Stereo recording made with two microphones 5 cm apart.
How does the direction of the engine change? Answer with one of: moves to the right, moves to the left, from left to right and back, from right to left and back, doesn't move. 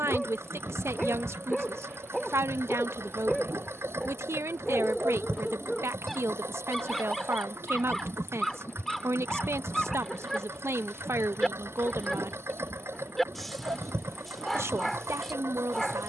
doesn't move.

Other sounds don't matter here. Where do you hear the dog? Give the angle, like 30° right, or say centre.
10° left.